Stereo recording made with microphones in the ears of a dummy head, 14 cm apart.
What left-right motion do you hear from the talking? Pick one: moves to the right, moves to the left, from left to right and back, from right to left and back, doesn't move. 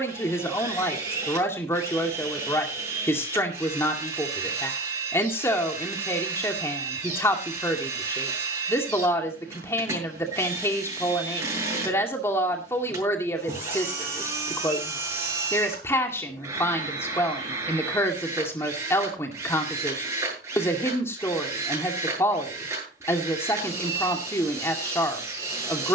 doesn't move.